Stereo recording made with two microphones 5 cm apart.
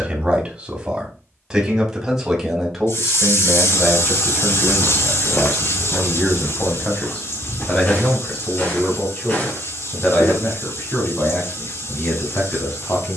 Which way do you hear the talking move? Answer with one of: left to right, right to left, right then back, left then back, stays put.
right to left.